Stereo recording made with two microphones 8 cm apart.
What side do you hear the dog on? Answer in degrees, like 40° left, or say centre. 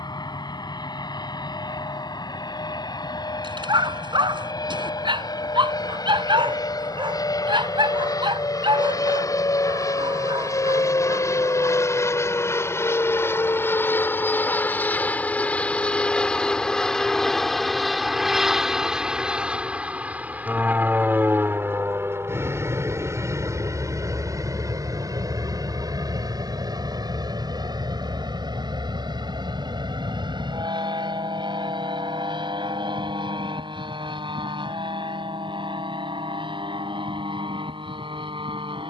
70° right.